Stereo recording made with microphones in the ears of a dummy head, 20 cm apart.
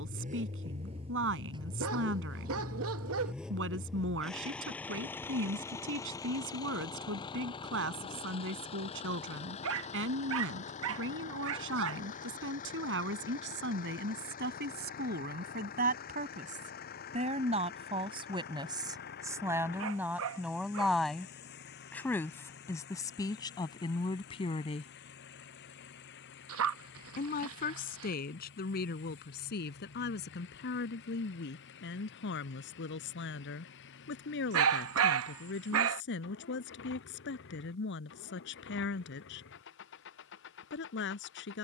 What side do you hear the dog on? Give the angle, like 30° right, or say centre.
70° right.